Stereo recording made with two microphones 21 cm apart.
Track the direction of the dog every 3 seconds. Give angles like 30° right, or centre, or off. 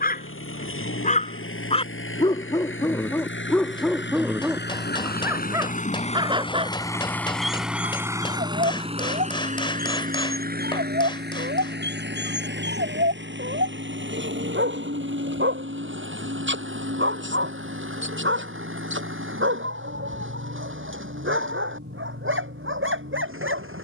30° left, centre, 30° right, 50° right, 60° right, 60° right, 70° right, 70° right.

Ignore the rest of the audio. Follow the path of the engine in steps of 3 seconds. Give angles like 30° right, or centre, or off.
80° left, 50° left, centre, 40° right, 60° right, 70° right, 70° right, 70° right.